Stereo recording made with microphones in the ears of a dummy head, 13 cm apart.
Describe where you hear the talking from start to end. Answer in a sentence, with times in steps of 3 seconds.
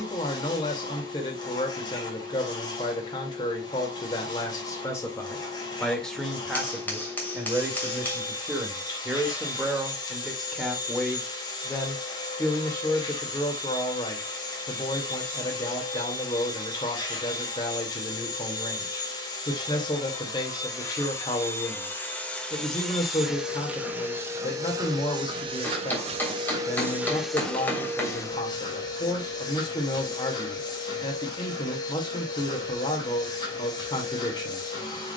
You can hear the talking on the left from 0 s, in the centre from 6 s and on the left from 12 s.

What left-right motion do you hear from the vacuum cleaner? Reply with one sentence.
You can hear the vacuum cleaner move from left to right and back again.